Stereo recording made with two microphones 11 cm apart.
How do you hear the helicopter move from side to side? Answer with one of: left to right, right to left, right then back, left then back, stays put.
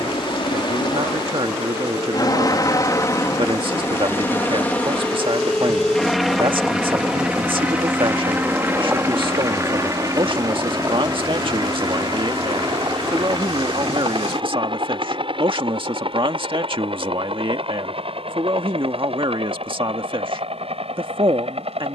left to right.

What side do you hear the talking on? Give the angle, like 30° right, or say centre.
50° right.